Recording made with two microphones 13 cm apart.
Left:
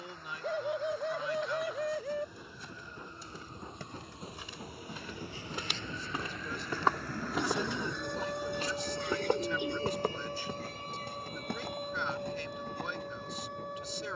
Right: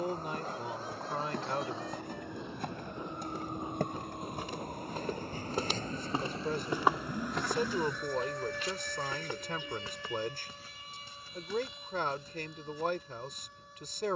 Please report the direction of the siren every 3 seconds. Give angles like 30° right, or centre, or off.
80° right, 60° right, 10° right, 40° left, 60° left.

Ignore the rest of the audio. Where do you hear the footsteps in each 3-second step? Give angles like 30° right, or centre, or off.
70° right, 60° right, centre, 70° left, 80° left.